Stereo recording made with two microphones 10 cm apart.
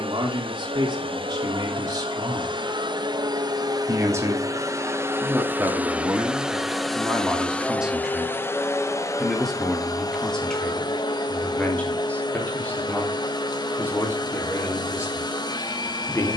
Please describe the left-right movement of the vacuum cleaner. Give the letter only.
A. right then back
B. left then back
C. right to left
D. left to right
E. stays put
C.